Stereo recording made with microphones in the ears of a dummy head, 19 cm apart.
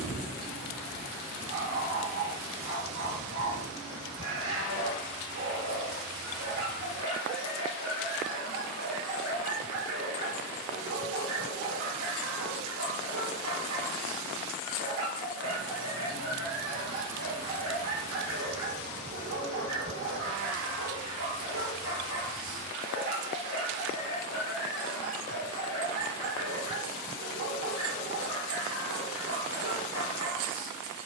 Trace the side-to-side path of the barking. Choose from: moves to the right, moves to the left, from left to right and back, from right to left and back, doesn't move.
doesn't move.